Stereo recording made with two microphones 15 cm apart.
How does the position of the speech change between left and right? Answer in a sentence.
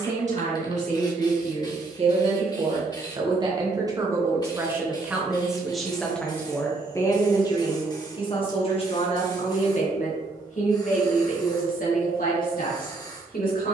You can hear the speech move from right to left.